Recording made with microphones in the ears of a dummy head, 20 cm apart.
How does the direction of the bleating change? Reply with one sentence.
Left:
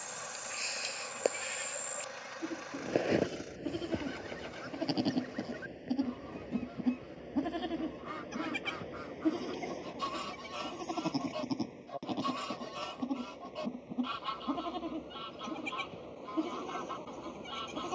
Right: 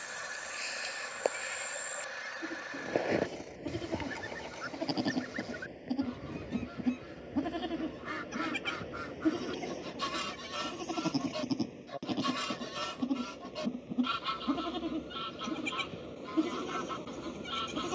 In this clip you hear the bleating move to the right.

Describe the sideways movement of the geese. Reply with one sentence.
In this clip you hear the geese stay put.